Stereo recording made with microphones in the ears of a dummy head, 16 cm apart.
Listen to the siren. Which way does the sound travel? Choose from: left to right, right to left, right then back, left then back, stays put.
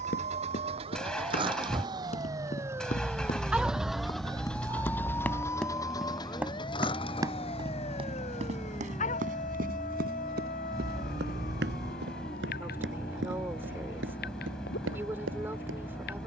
right to left.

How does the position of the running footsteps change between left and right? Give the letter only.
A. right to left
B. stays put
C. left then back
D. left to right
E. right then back
D.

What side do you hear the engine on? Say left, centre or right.
centre.